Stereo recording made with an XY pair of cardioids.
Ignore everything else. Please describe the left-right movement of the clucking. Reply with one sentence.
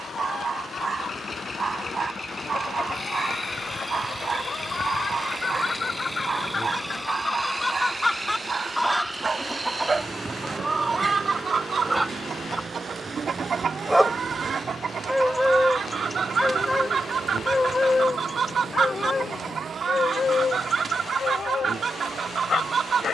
In this clip you hear the clucking go from the left side to the right.